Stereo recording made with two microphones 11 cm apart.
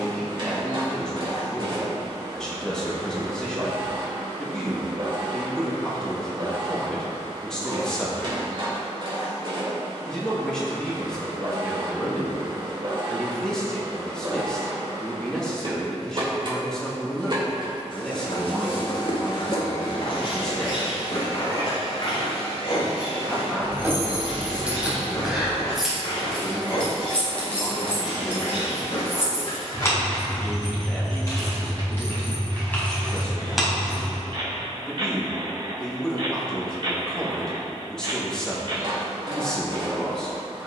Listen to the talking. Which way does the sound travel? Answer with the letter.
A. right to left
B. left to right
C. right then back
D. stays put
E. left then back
D.